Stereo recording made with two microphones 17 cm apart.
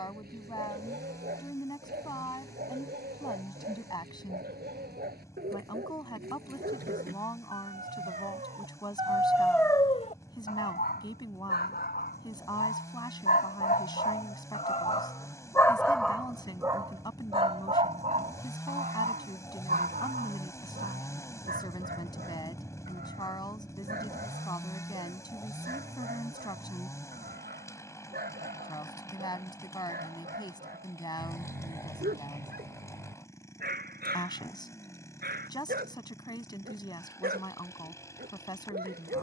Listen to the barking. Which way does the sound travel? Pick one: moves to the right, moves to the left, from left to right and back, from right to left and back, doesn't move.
from right to left and back.